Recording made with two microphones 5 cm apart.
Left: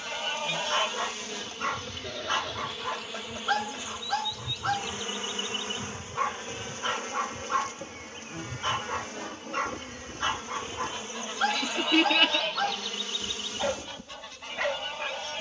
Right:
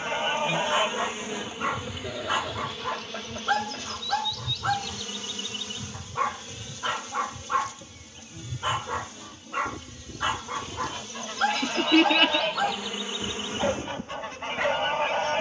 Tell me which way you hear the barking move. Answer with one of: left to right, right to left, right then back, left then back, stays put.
stays put.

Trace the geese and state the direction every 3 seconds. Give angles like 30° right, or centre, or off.
10° right, 10° left, 10° left, centre, 30° right.